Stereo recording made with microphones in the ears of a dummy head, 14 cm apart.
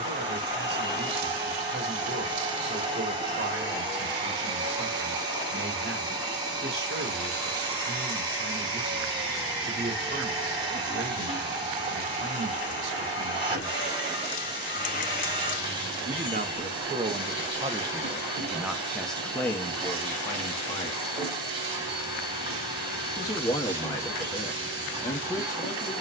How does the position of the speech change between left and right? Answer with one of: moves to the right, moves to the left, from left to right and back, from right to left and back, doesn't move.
moves to the left.